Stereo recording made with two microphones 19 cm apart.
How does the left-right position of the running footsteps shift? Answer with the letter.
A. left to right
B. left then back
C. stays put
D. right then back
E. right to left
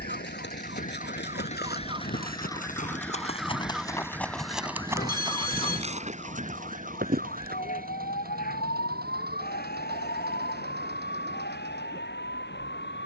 A.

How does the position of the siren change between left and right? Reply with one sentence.
You can hear the siren travel towards the left.